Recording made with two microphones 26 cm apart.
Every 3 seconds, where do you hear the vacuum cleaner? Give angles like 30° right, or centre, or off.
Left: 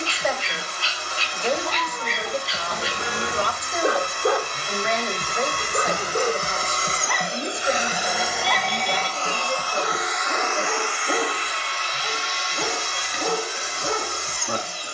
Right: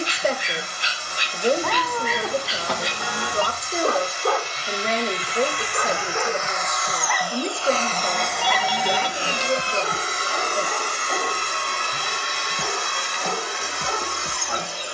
70° left, 50° left, 20° left, 40° right, 60° right.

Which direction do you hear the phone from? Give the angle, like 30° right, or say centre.
20° left.